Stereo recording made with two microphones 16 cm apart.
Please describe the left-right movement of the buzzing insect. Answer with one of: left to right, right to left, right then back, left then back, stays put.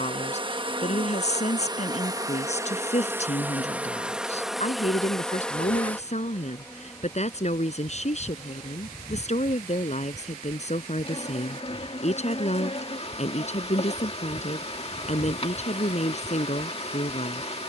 right to left.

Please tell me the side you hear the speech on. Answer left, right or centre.
left.